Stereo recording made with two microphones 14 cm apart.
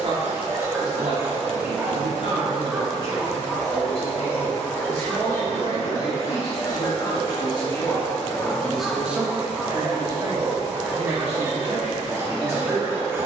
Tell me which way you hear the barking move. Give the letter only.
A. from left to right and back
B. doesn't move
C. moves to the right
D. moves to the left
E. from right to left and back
E.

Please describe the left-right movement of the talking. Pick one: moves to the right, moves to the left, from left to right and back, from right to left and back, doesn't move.
from right to left and back.